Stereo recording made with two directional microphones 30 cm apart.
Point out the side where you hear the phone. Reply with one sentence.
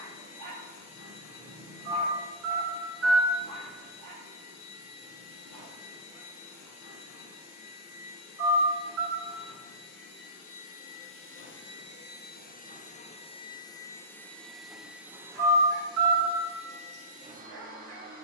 In this clip you hear the phone on the right.